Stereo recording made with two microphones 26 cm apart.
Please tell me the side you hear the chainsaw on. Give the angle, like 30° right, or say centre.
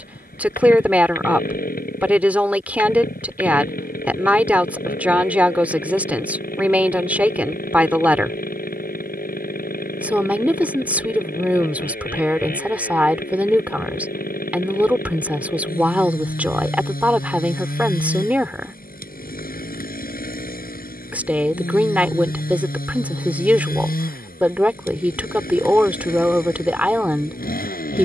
30° left.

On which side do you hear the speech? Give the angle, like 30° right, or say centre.
10° right.